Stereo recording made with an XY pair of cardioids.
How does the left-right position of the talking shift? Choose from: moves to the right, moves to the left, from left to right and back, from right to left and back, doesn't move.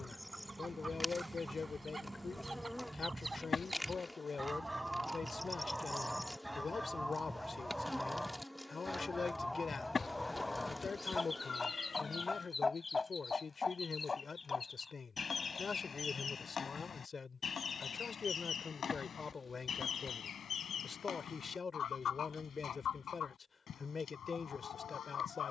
doesn't move.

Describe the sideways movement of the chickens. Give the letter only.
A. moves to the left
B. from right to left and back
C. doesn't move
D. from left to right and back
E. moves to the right
A.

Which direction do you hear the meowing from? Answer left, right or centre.
left.